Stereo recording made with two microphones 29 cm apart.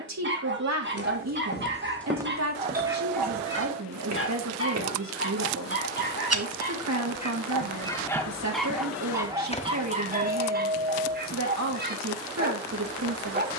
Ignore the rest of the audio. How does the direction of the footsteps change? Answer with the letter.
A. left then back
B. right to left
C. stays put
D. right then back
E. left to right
D.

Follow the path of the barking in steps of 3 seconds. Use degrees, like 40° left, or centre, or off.
40° right, 40° left, 20° left, 30° right, 30° right.